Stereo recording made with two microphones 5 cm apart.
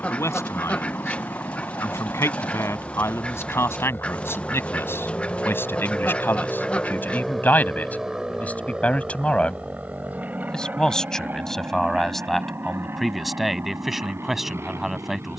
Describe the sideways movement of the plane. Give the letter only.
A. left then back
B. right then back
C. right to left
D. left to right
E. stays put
D.